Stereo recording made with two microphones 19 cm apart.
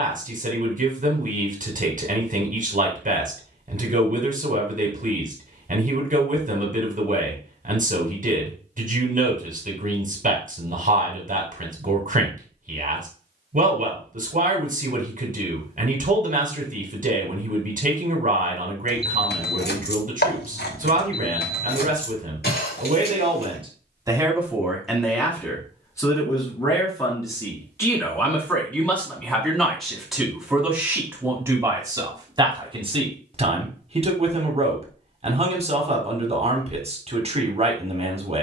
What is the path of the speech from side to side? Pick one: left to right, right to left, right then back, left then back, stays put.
left then back.